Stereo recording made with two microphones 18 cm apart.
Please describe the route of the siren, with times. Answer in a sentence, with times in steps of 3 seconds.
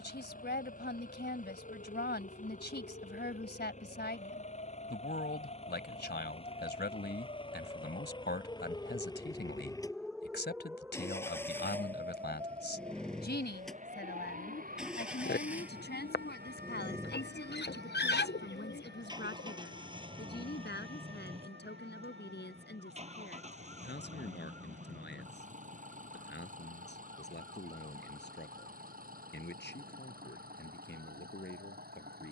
You can hear the siren on the left from 0 s, in the centre from 9 s and on the right from 12 s.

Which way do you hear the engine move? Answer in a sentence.
You can hear the engine move from left to right.